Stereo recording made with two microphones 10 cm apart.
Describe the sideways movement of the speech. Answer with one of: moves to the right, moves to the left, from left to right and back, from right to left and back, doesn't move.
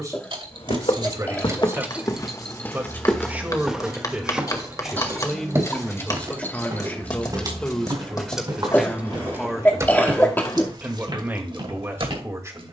from right to left and back.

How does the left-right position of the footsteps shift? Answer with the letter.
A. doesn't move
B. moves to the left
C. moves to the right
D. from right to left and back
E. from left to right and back
C.